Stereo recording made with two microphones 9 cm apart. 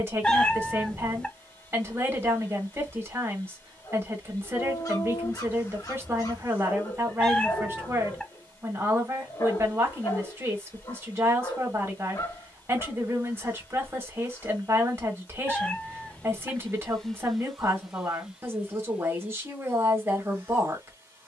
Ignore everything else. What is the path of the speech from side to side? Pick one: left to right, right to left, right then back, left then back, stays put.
stays put.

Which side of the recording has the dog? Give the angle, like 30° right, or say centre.
40° left.